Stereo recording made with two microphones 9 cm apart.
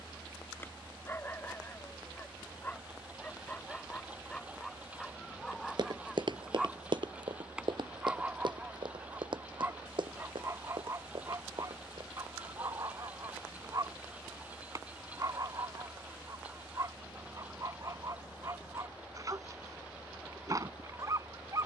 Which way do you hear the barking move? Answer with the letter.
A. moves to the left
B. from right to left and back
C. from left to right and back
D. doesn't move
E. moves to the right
E.